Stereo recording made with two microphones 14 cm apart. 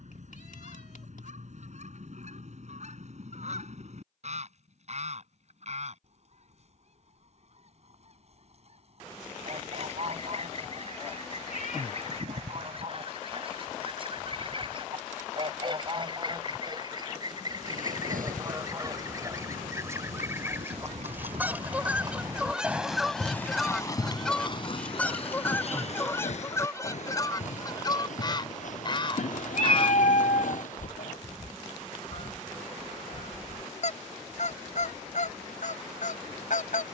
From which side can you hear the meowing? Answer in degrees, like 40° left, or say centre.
70° left.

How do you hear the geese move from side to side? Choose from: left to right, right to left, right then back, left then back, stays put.
right to left.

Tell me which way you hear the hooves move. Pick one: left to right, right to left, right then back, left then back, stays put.
right to left.